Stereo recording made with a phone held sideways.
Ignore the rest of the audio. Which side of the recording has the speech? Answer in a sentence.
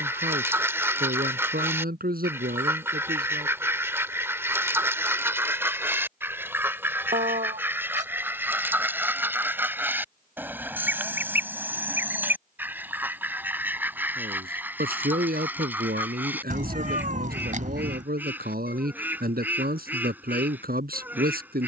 You can hear the speech on the right.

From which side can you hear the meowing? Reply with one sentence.
In this clip you hear the meowing on the right.